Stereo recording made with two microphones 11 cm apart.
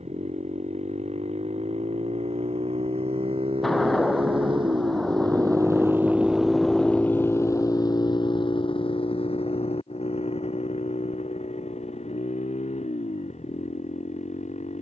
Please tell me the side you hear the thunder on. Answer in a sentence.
In this clip you hear the thunder in the centre.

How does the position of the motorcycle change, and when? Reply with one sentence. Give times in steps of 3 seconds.
In this clip you hear the motorcycle on the right from 0 s and on the left from 6 s.